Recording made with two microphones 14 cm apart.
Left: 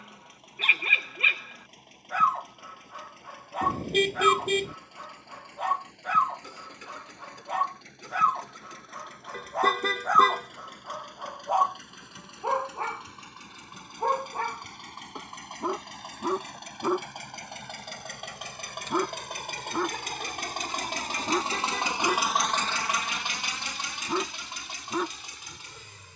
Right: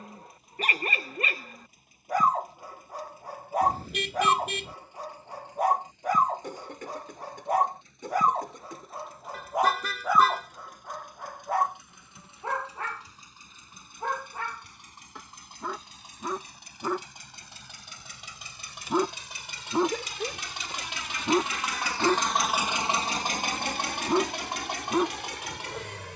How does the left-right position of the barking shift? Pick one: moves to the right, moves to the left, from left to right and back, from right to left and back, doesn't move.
from right to left and back.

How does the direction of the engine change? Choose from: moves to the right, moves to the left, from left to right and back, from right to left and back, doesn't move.
moves to the right.